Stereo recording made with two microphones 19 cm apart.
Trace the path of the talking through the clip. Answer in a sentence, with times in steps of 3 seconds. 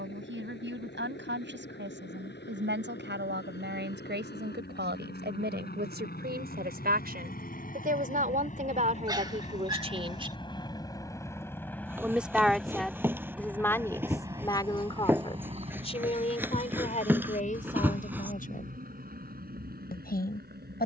In this clip you hear the talking on the right from 0 s, in the centre from 12 s and on the left from 15 s.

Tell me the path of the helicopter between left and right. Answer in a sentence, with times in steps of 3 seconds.
You can hear the helicopter on the left from 0 s, in the centre from 12 s and on the right from 15 s.